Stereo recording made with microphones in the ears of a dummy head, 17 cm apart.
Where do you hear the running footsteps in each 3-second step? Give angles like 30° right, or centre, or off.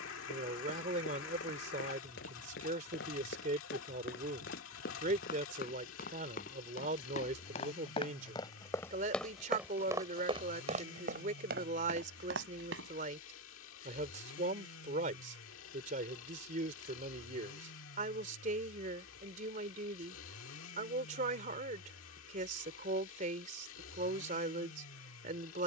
60° left, 50° left, 30° left, 30° right, 70° right, off, off, off, off.